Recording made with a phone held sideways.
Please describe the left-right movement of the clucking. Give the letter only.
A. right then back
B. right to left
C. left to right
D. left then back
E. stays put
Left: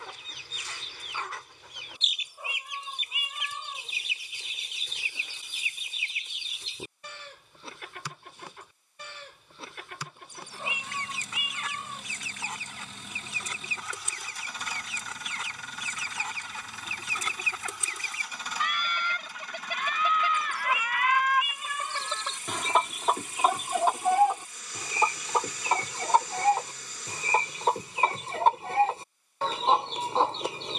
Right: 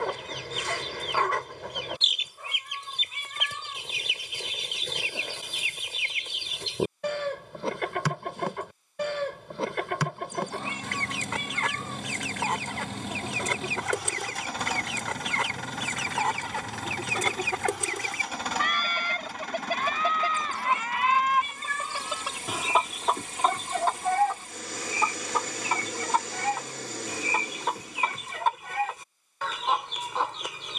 B.